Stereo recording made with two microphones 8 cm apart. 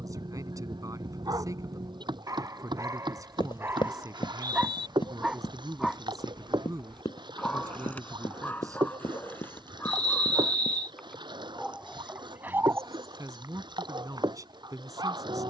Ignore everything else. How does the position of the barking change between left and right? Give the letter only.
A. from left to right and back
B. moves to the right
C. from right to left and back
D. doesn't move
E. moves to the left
C.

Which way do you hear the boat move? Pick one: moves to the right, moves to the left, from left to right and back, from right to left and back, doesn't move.
doesn't move.